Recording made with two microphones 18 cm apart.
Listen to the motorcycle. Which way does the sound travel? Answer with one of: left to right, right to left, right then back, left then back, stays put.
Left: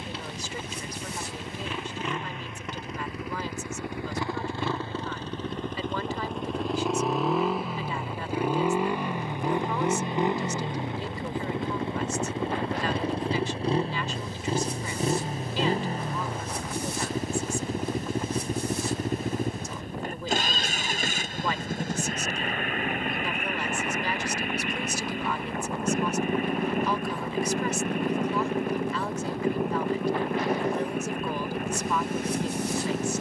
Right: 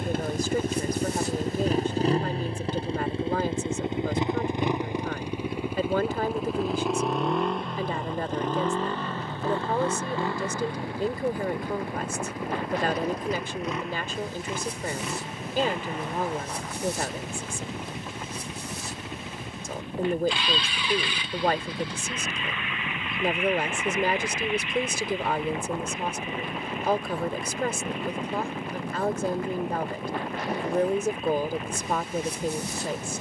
right to left.